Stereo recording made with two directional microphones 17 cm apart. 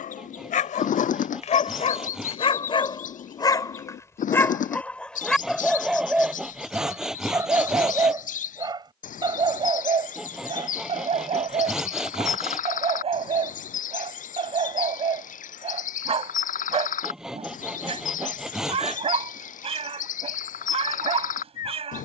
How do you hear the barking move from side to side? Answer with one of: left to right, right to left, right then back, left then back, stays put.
left to right.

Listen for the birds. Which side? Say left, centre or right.
left.